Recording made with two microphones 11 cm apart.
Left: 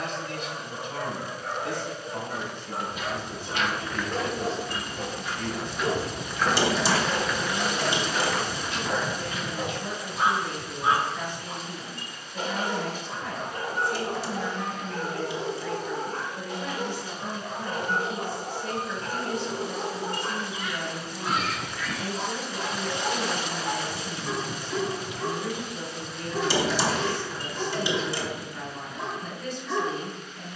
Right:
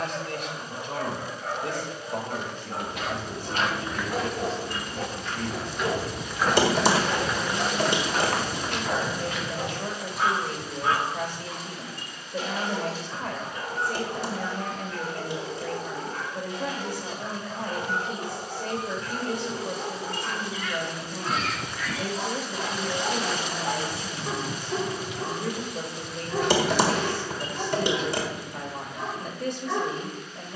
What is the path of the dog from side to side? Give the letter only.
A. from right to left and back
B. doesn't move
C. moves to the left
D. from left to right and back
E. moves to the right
A.